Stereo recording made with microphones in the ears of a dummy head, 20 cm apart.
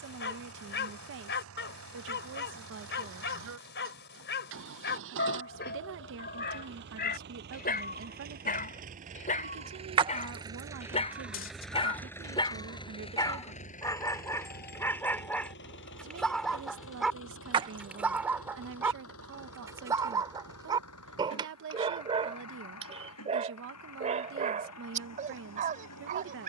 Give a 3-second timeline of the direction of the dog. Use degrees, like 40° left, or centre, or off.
50° left, 50° left, 40° left, 30° left, 20° left, centre, 10° right, 30° right, 30° right.